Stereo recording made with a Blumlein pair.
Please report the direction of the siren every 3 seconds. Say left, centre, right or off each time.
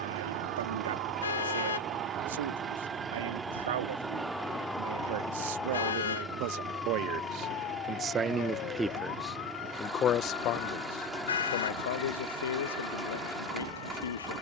right, centre, left, left, left.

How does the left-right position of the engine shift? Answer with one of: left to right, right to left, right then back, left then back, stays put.
stays put.